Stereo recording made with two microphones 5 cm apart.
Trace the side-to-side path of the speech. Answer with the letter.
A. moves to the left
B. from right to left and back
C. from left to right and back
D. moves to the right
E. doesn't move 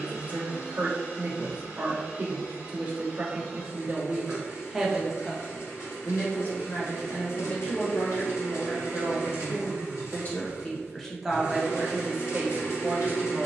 B.